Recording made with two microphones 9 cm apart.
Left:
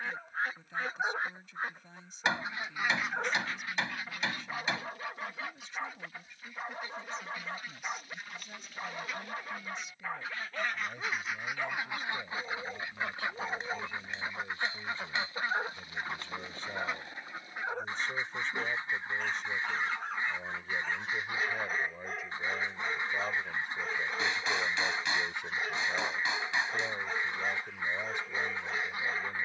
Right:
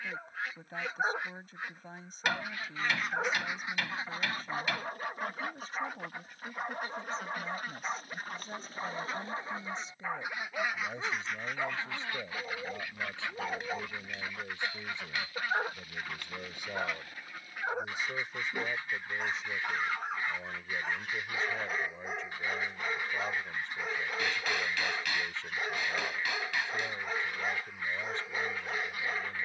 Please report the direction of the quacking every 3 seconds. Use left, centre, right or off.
left, right, right, centre, left, left, left, left, left, left.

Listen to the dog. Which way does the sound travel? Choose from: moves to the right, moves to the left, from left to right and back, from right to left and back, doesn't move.
doesn't move.